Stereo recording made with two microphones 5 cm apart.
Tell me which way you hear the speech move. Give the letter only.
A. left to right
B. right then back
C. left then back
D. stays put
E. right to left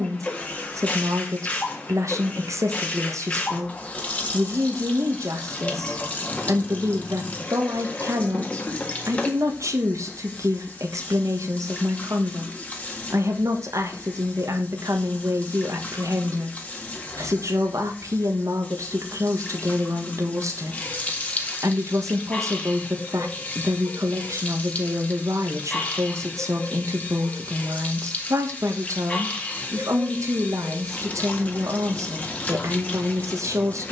D.